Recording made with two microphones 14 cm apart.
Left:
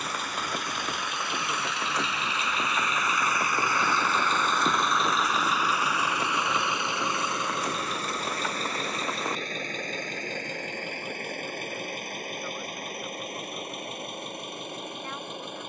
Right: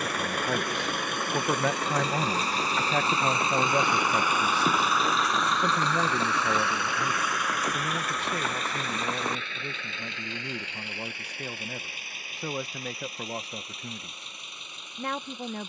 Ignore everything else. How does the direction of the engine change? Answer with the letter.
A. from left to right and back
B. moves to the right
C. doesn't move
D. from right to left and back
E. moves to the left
E.